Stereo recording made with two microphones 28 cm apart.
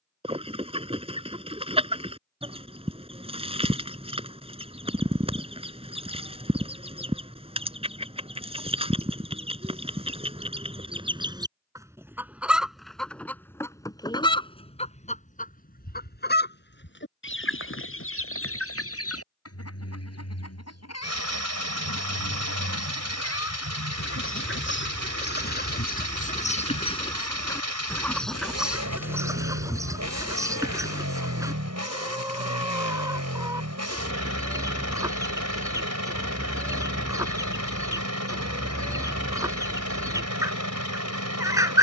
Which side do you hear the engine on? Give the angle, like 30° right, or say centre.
70° right.